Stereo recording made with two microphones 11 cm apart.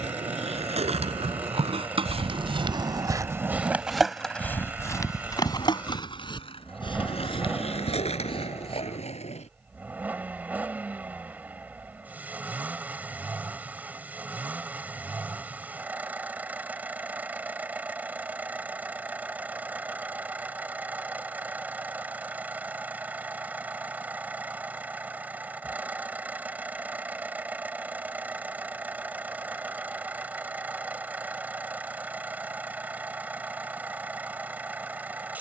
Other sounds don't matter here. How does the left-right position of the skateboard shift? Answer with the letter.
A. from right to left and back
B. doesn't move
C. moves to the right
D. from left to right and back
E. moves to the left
E.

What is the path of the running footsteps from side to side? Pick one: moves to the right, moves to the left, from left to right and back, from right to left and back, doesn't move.
moves to the left.